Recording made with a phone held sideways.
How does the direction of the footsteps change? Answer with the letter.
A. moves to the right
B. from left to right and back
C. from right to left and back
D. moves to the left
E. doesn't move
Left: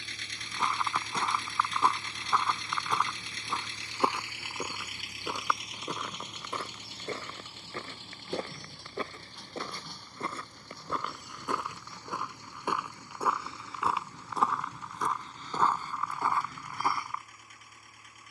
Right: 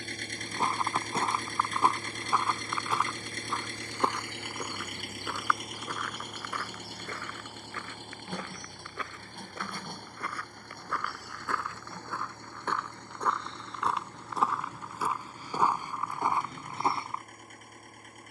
C.